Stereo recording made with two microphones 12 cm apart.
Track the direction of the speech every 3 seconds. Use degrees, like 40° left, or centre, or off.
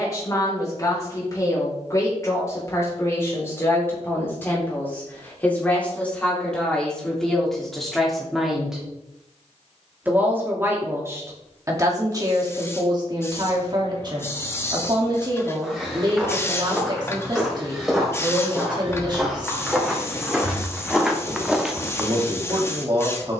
30° left, 20° left, centre, 20° right, 30° right, 40° right, 40° right, 40° right.